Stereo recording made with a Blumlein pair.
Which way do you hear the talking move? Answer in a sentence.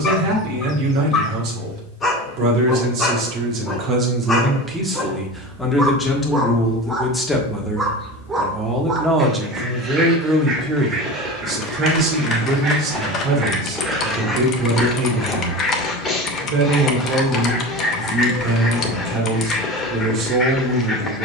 You can hear the talking go left and come back.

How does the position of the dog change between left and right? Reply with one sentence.
You can hear the dog move from left to right and back again.